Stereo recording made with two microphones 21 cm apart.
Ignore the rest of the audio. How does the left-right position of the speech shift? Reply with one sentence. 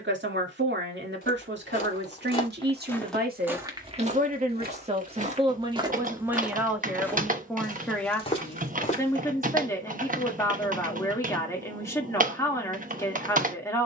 In this clip you hear the speech go from the right side to the left.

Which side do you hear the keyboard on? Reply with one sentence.
You can hear the keyboard on the right.